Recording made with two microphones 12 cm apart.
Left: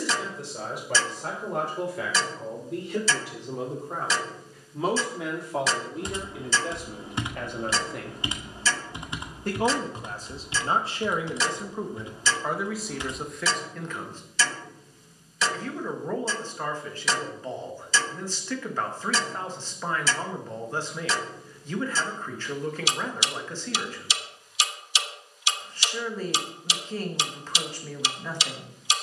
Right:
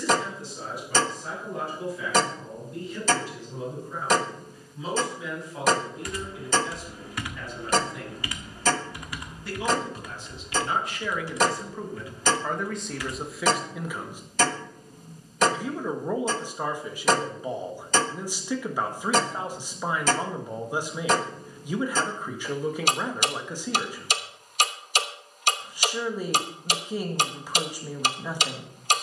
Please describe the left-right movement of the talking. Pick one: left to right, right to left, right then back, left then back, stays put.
left to right.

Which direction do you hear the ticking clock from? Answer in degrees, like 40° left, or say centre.
50° right.